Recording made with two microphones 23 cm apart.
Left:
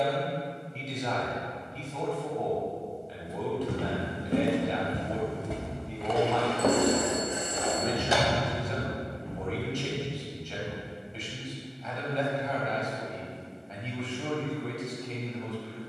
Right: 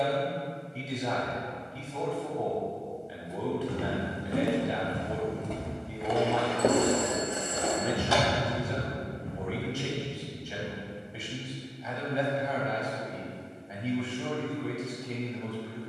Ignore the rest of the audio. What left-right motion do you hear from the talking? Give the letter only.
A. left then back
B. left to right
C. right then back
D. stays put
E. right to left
D.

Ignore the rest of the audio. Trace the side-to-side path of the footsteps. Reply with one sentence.
You can hear the footsteps travel towards the right.